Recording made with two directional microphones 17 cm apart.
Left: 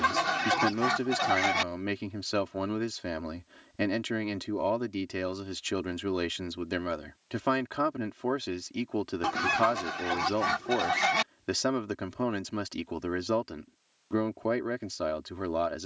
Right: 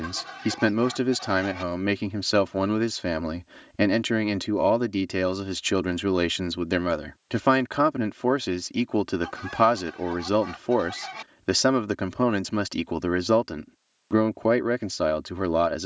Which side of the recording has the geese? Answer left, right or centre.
left.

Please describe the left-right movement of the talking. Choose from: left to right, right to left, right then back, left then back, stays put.
stays put.